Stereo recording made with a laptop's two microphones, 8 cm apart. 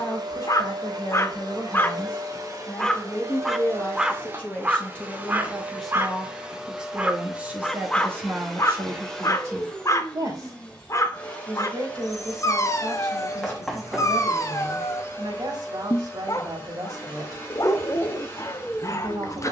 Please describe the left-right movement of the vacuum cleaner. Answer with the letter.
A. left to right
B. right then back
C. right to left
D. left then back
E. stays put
C.